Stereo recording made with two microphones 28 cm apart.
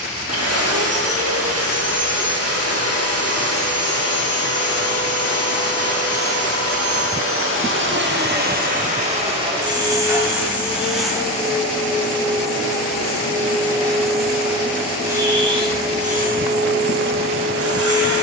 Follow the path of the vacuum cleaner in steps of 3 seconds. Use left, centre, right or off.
right, right, right, centre, centre, right.